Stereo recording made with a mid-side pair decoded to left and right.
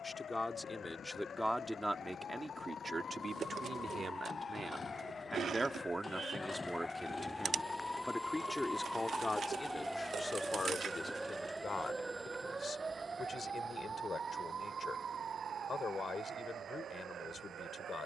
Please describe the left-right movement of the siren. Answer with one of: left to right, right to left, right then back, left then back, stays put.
left to right.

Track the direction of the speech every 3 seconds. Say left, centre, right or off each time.
centre, right, centre, left, left, left.